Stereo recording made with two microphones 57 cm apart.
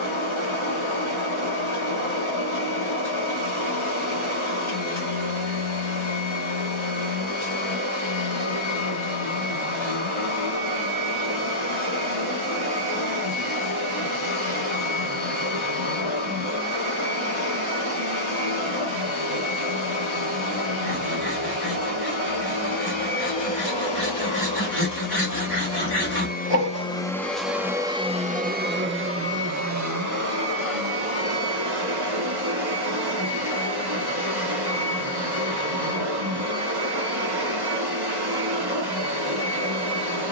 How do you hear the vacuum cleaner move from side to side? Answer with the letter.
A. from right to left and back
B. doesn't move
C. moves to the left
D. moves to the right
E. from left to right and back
D.